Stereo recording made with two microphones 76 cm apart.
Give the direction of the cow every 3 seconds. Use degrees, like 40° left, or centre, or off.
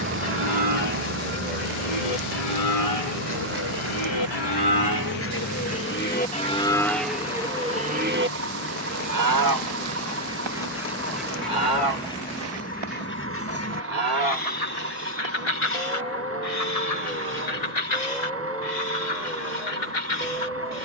60° left, 30° left, centre, 30° right, 50° right, 60° right, 60° right.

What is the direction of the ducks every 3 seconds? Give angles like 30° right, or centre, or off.
60° left, 30° left, 10° right, centre, 20° left, 50° left, 70° left.